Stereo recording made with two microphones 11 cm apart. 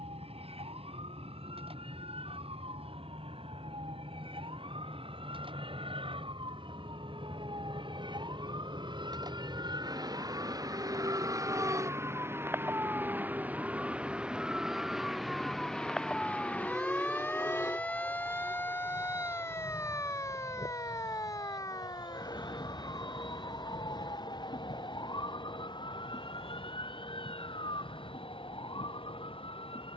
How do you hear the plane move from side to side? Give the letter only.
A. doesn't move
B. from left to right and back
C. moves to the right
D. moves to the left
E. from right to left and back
D.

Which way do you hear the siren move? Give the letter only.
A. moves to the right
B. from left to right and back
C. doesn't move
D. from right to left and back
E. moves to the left
E.